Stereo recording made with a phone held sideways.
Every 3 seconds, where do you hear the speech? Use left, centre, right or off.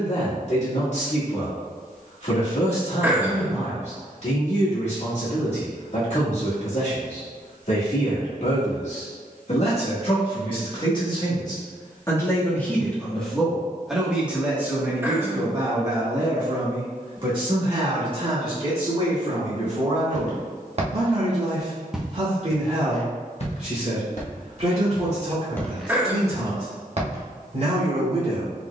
left, left, left, left, centre, right, right, right, right, right.